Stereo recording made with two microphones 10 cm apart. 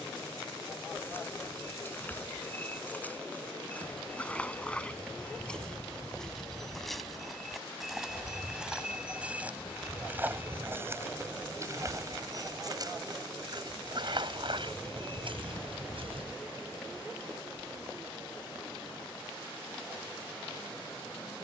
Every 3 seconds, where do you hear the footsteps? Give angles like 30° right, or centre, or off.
20° left, 10° left, centre, 20° right, 50° right, 70° right, off.